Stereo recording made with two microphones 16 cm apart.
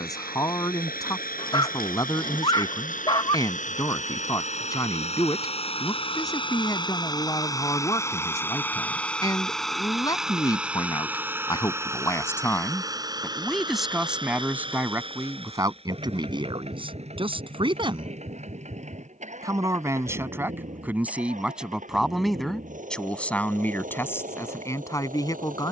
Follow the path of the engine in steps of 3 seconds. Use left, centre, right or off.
left, left, left, centre, right, right, right, right, right.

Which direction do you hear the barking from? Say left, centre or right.
left.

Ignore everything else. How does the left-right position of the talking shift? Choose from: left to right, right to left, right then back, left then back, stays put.
right then back.